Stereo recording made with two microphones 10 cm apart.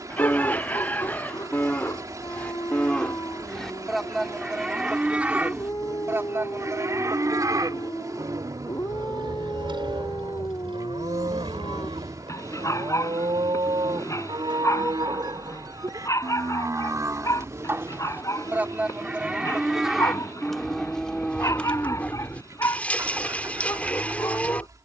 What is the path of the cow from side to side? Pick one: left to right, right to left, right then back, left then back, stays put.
right then back.